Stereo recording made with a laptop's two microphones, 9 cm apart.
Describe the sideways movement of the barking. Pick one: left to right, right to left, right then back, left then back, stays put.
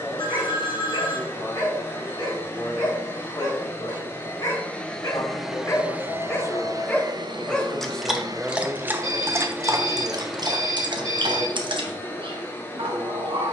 left to right.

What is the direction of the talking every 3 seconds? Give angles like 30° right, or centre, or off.
70° left, 50° left, 10° left, 40° right, 60° right.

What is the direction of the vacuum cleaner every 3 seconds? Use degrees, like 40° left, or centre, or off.
30° left, 10° left, 40° right, centre, 20° left.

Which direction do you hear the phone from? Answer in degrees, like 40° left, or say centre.
70° left.